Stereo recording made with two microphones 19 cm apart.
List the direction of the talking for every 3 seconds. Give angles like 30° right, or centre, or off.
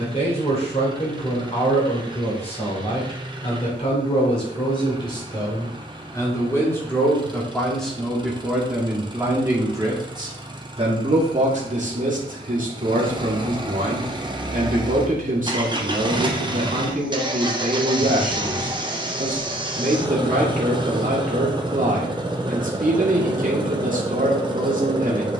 30° left, 30° left, centre, 30° right, 40° right, 40° right, 40° right, 40° right, 40° right.